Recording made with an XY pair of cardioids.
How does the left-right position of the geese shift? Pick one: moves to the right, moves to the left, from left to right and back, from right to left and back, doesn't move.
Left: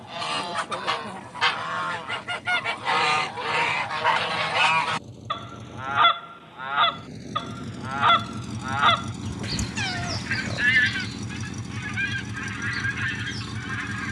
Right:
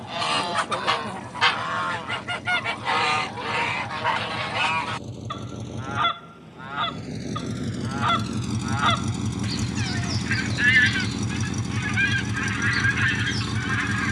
from right to left and back.